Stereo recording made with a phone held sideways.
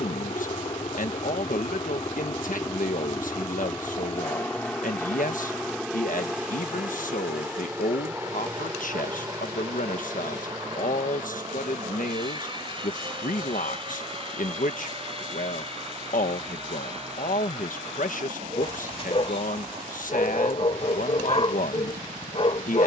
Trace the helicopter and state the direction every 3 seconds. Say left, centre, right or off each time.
left, centre, centre, right, right, right, right, right.